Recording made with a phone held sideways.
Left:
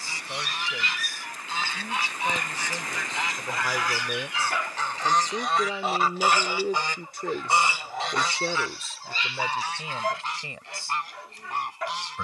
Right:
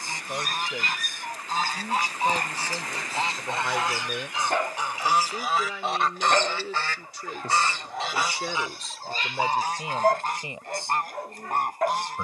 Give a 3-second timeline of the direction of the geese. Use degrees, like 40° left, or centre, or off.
40° right, 20° right, centre, 50° right.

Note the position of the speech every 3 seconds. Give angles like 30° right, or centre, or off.
20° right, 10° left, 40° left, 20° right.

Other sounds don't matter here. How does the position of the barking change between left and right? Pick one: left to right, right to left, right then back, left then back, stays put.
stays put.